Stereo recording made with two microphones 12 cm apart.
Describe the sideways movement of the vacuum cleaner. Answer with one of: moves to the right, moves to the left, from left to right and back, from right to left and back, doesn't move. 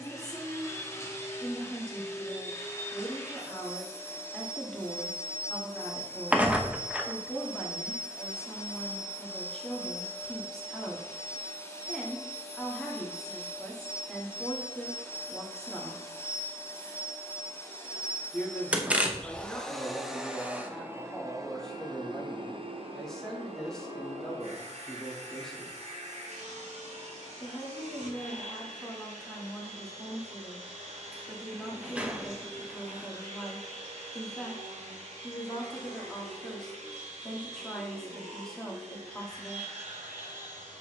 moves to the right.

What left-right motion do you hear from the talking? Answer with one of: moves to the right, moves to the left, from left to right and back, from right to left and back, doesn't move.
doesn't move.